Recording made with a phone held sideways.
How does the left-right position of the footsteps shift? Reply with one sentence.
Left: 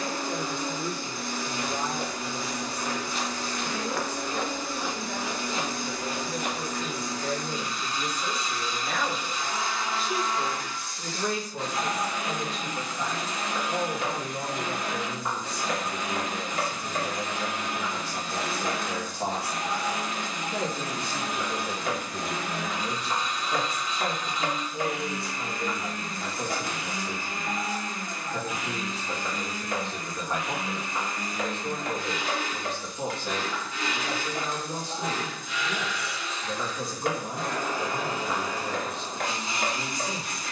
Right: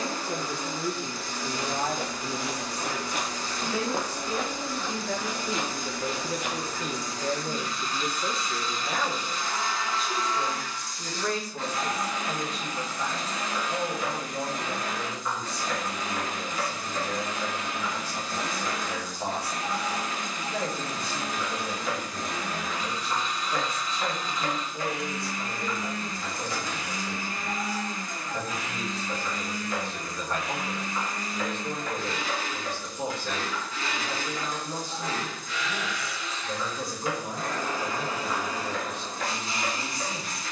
You can hear the footsteps travel towards the left.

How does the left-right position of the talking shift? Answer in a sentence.
You can hear the talking move to the left.